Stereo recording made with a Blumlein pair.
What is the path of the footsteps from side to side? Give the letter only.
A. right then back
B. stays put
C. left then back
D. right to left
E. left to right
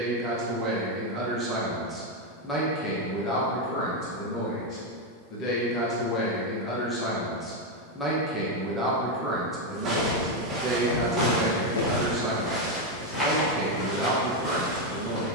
D.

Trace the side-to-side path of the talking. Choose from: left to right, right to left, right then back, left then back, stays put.
left then back.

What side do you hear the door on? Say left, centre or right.
left.